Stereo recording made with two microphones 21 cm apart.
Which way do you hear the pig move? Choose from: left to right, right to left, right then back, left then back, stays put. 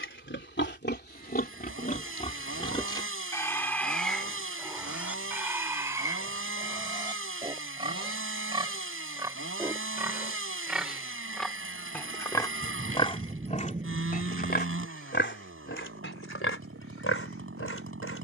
right then back.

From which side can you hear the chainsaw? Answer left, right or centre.
right.